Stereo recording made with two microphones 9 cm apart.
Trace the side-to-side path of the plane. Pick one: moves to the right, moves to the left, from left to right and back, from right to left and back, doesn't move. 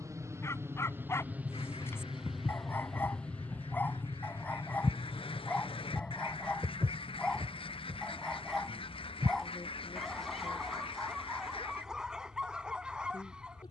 moves to the left.